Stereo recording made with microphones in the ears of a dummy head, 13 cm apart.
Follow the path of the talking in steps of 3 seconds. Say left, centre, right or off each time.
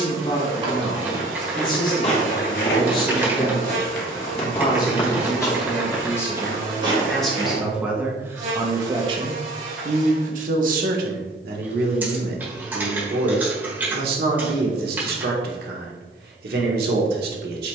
left, left, centre, right, right, right.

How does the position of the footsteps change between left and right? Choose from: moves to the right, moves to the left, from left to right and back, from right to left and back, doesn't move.
from right to left and back.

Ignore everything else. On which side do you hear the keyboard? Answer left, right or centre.
centre.